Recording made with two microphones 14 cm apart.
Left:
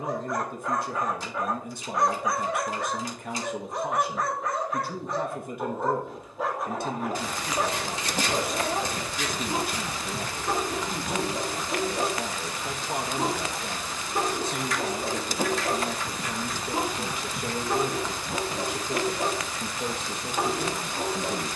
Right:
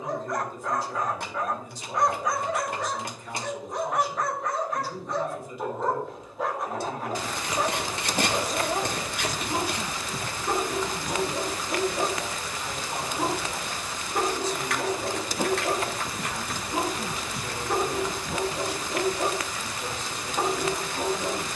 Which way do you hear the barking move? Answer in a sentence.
In this clip you hear the barking stay put.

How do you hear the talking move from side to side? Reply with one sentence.
You can hear the talking stay put.